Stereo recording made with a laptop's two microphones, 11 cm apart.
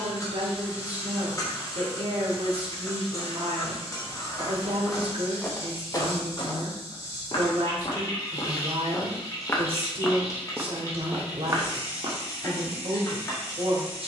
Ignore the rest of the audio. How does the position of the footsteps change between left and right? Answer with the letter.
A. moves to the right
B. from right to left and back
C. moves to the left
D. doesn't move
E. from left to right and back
B.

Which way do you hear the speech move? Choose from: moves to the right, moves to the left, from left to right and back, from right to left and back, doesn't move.
doesn't move.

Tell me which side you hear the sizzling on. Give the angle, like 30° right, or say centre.
30° left.